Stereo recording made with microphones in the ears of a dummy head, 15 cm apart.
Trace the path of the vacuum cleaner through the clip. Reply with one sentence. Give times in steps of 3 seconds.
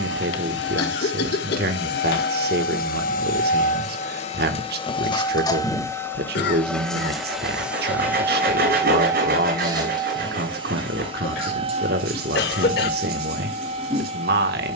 You can hear the vacuum cleaner on the left from 0 s, in the centre from 6 s and on the right from 9 s.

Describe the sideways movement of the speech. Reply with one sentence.
In this clip you hear the speech stay in one place.